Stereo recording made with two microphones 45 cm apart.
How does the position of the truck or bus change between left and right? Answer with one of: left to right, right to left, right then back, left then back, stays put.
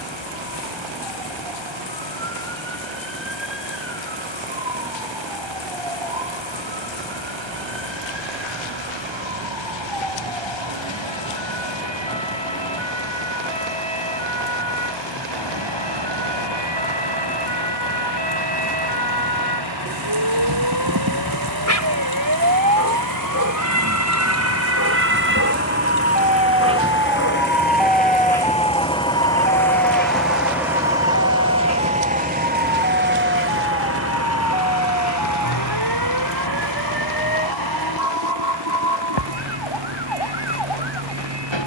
left to right.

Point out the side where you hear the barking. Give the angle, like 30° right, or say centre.
40° left.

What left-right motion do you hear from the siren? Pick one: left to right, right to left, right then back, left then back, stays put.
right to left.